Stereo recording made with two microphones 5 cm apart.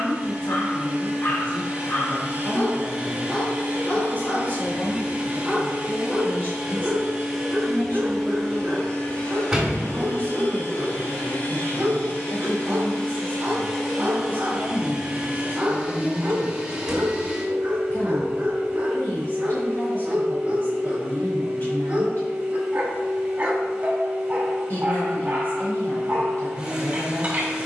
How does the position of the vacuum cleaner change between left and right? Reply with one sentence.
In this clip you hear the vacuum cleaner move from right to left and back again.